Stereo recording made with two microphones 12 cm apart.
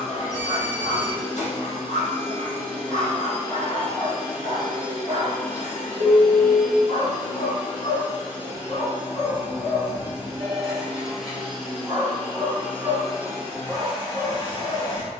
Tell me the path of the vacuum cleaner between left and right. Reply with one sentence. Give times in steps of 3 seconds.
In this clip you hear the vacuum cleaner on the left from 0 s, in the centre from 6 s and on the left from 12 s.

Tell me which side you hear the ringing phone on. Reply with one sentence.
You can hear the ringing phone on the right.